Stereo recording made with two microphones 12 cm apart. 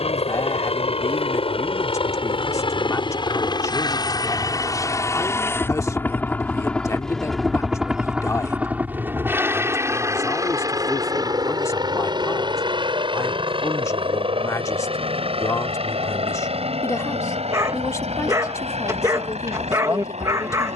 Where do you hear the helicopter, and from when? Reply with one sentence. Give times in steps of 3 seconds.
In this clip you hear the helicopter on the left from 0 s, in the centre from 6 s and on the right from 9 s.